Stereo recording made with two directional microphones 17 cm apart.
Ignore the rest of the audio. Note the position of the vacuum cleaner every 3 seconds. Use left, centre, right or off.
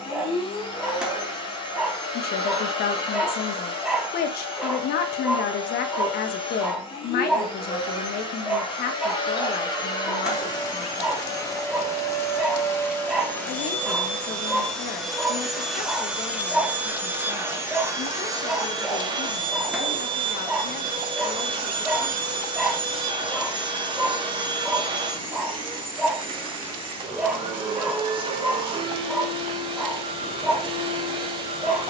left, left, left, left, centre, centre, right, right, right, right, right.